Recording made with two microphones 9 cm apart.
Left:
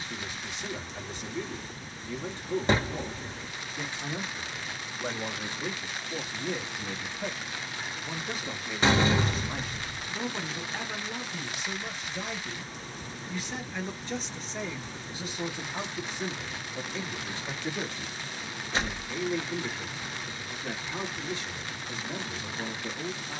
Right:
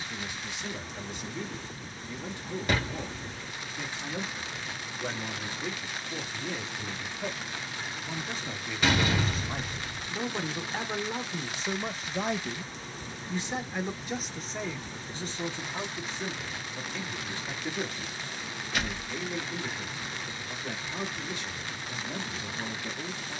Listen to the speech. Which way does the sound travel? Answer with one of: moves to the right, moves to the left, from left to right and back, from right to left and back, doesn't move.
from left to right and back.